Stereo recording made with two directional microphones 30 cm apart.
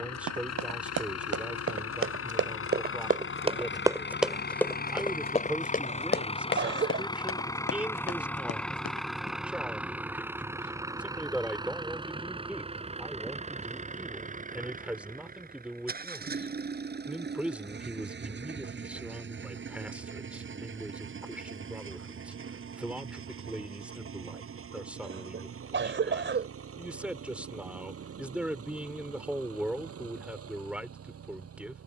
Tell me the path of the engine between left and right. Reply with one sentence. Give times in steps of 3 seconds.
You can hear the engine on the left from 0 s, in the centre from 6 s and on the right from 12 s.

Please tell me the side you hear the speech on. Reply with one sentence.
You can hear the speech in the centre.